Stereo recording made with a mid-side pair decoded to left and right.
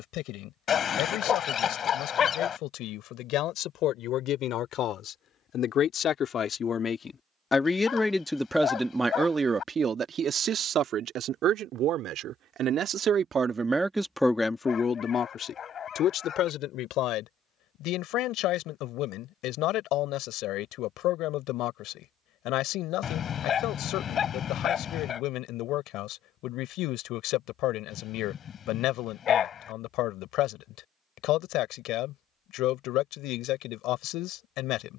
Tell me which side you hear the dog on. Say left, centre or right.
left.